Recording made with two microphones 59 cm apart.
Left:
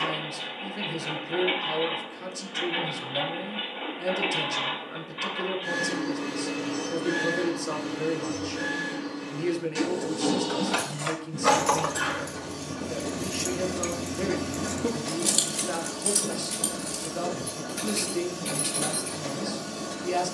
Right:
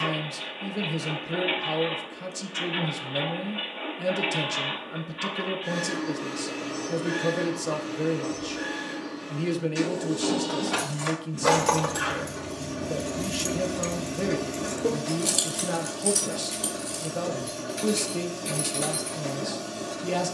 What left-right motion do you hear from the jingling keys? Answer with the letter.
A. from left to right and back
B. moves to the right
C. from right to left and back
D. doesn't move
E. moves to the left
E.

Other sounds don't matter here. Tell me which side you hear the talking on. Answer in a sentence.
You can hear the talking on the right.